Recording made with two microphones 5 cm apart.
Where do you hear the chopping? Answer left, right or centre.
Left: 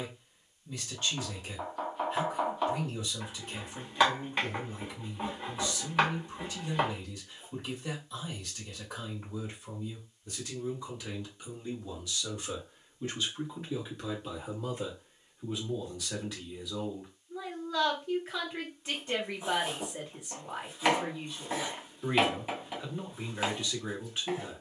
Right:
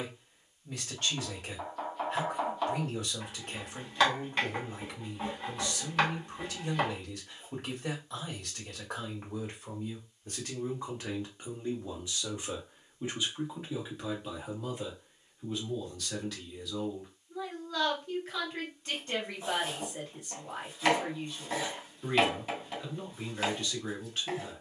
centre.